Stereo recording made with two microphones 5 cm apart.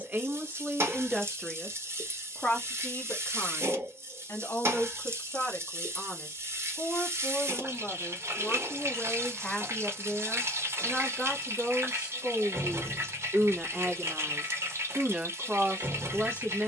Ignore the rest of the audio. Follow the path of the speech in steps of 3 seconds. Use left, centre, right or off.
centre, left, left, centre, right, right.